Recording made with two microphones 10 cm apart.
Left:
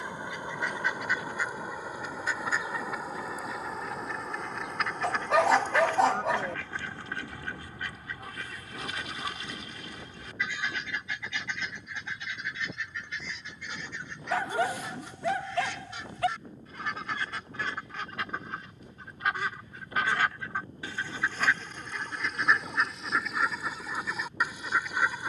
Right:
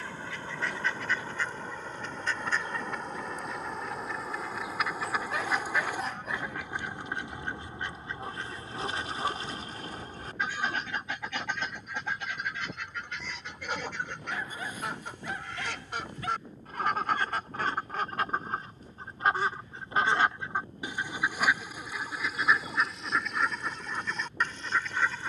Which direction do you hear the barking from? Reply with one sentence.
In this clip you hear the barking on the left.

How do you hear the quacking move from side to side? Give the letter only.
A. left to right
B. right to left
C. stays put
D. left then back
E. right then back
E.